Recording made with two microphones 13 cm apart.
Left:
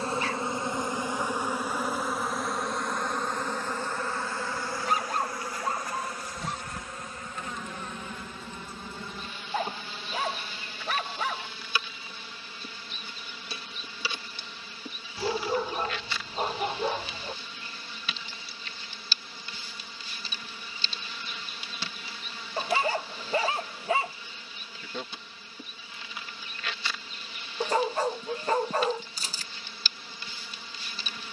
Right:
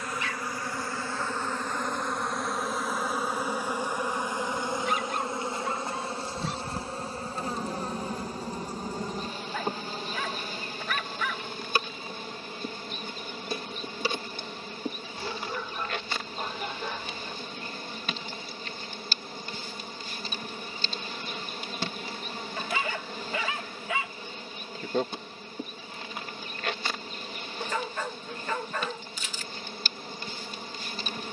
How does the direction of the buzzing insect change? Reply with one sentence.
In this clip you hear the buzzing insect move from left to right.